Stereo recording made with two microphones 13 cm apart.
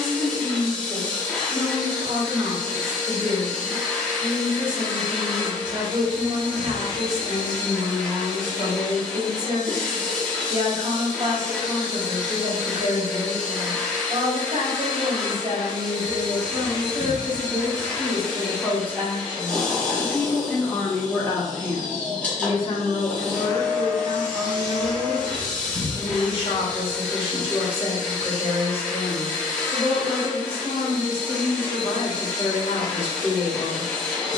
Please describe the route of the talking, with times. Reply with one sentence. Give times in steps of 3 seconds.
You can hear the talking on the right from 0 s, in the centre from 18 s and on the left from 21 s.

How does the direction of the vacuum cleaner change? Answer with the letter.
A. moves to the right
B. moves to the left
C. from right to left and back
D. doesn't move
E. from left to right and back
D.